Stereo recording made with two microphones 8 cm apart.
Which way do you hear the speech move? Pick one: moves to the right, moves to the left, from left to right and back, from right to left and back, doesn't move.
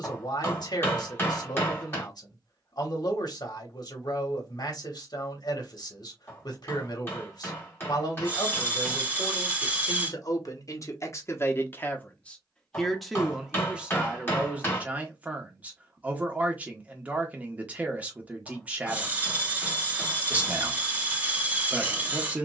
moves to the right.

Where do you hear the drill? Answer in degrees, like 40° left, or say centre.
20° right.